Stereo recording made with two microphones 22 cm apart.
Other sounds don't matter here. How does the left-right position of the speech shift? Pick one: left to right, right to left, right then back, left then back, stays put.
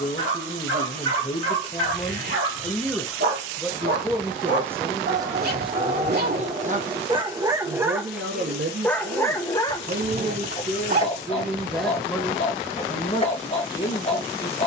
right then back.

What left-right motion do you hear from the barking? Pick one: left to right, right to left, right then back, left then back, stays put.
right to left.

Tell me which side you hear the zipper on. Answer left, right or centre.
right.